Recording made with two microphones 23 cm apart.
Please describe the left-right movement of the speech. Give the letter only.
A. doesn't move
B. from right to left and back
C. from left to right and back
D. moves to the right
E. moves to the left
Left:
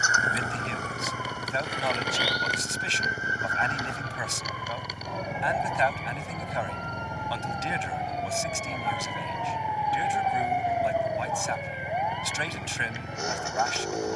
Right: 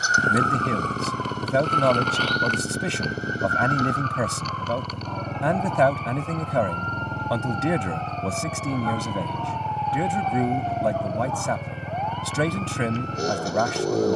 A.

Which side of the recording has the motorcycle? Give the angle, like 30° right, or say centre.
40° right.